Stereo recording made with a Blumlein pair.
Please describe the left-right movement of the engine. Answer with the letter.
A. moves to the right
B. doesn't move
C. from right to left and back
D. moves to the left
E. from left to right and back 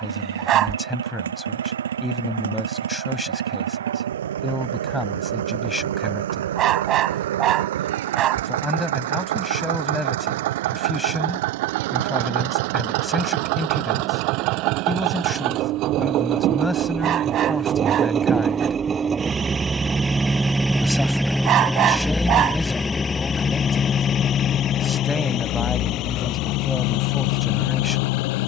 D.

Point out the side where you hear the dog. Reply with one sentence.
In this clip you hear the dog on the right.